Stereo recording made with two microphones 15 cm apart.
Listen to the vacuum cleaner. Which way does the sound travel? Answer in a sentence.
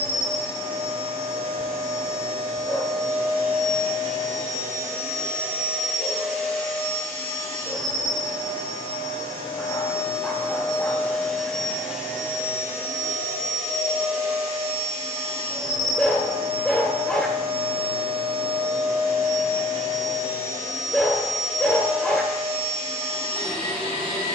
In this clip you hear the vacuum cleaner move from right to left and back again.